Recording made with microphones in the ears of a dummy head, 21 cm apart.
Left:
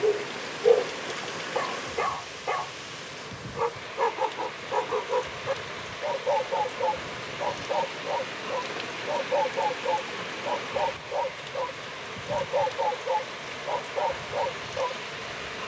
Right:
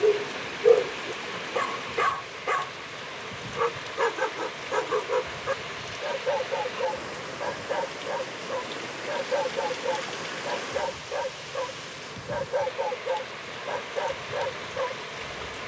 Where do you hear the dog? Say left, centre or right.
right.